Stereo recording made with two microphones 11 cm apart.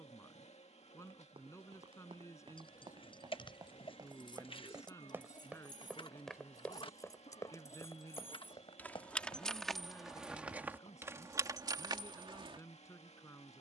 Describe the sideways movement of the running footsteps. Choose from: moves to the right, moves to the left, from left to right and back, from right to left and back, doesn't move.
moves to the left.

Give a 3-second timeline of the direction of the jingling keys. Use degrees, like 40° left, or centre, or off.
50° left, 40° left, 30° left, 10° right, 50° right.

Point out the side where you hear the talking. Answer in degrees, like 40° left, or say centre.
30° left.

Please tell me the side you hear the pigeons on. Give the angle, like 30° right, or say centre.
50° left.